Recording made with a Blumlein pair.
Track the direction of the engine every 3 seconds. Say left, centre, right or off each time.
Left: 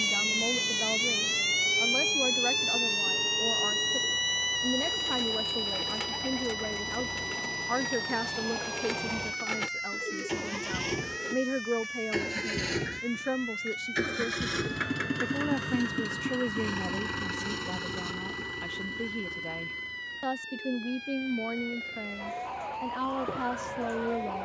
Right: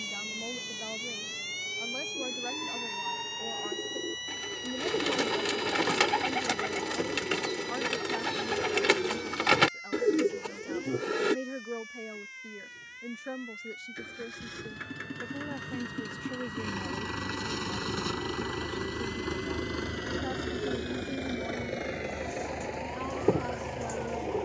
left, left, left, left, left, centre, right, right.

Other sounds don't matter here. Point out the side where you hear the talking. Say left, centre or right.
left.